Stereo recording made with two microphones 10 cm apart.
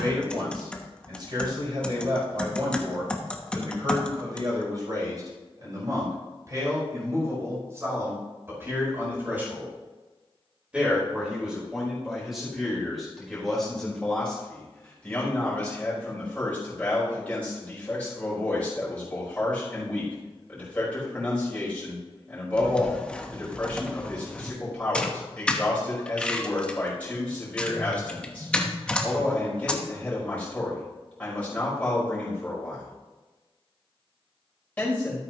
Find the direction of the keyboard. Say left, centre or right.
centre.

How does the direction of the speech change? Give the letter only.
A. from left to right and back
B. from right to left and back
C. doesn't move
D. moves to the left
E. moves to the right
D.